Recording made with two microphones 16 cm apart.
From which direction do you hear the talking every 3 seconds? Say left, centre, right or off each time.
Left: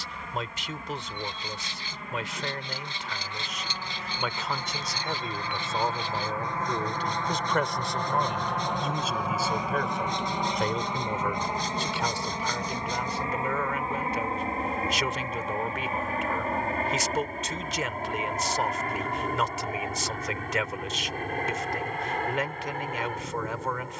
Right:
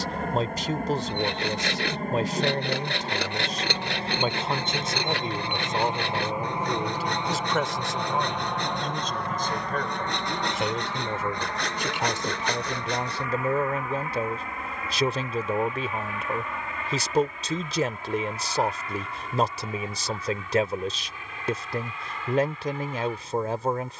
right, right, centre, centre, right, right, right, right.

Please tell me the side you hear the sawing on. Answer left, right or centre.
right.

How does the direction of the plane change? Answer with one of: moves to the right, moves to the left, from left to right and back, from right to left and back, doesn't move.
moves to the left.